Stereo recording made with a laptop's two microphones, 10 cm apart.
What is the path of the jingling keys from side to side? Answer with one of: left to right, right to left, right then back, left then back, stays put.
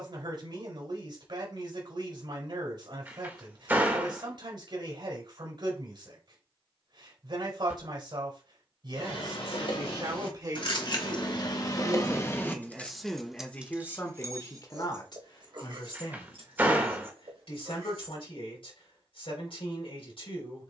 left to right.